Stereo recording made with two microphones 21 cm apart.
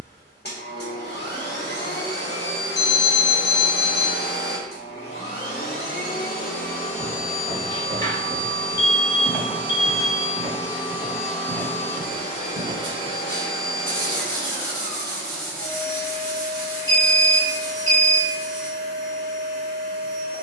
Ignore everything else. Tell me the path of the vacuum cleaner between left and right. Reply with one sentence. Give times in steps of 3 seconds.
In this clip you hear the vacuum cleaner on the left from 0 s, in the centre from 9 s and on the left from 12 s.